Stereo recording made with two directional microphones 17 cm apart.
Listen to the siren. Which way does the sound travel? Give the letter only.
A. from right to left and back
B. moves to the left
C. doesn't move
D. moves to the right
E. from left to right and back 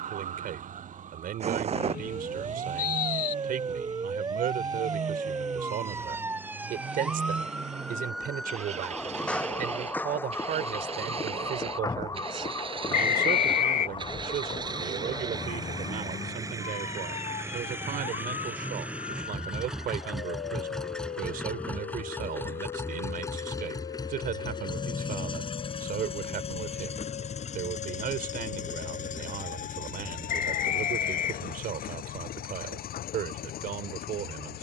B.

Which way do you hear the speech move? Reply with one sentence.
You can hear the speech stay put.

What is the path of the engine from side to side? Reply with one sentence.
In this clip you hear the engine move to the left.